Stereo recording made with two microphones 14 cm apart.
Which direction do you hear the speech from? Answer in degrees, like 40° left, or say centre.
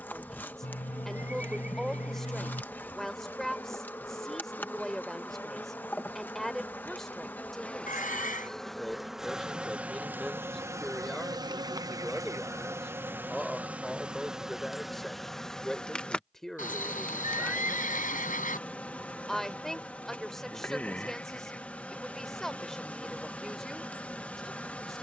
centre.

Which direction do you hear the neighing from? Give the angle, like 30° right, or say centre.
80° left.